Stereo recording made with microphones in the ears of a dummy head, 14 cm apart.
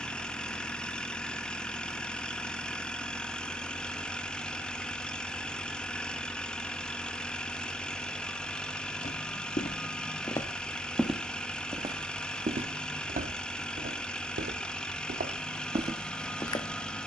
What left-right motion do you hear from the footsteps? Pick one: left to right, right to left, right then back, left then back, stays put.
right then back.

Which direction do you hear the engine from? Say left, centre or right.
centre.